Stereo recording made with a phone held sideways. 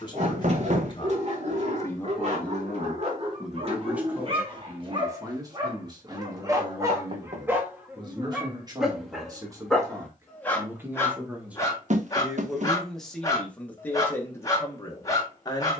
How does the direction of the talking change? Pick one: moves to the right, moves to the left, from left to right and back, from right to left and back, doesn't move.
from left to right and back.